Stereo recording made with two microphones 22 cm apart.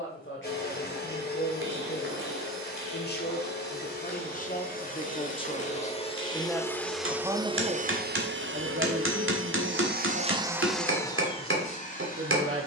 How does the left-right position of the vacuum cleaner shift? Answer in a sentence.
You can hear the vacuum cleaner move from left to right and back again.